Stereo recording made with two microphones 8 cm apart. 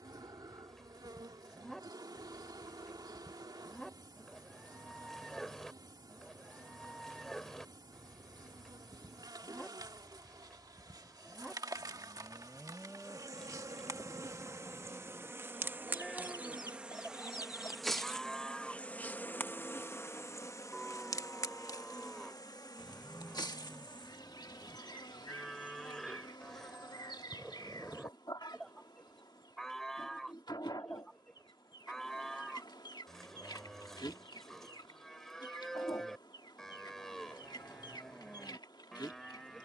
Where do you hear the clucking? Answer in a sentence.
In this clip you hear the clucking on the left.